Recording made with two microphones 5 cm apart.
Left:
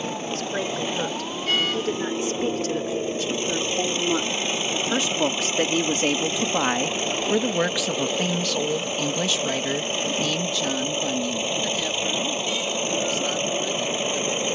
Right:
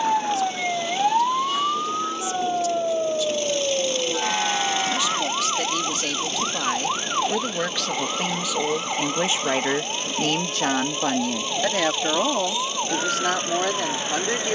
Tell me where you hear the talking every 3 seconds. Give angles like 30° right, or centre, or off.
50° left, 40° left, 10° left, 50° right, 80° right.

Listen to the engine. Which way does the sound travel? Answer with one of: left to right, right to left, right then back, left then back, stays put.
stays put.